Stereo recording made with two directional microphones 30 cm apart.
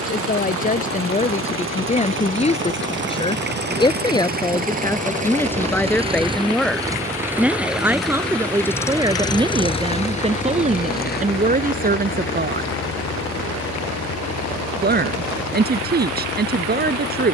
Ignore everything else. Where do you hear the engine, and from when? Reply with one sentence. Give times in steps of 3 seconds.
You can hear the engine on the right from 0 s, in the centre from 6 s and on the left from 9 s.